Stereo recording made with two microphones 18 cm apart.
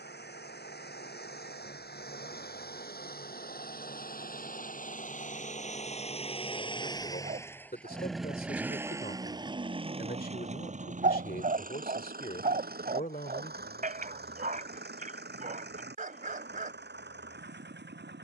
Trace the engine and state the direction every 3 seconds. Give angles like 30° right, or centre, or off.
70° left, 50° left, 10° left, 40° right, 60° right, 70° right.